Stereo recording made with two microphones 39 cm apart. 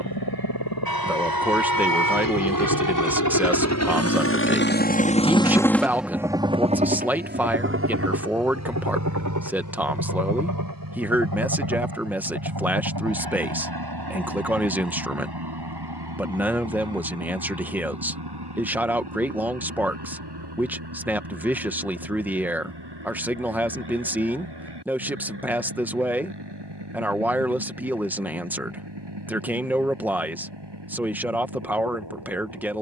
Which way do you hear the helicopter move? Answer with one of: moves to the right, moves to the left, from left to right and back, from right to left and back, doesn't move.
moves to the right.